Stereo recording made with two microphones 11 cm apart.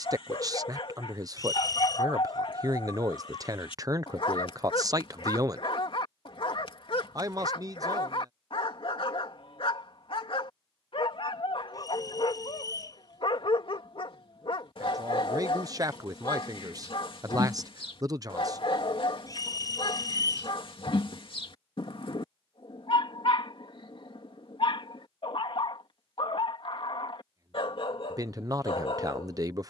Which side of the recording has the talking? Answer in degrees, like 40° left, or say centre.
30° right.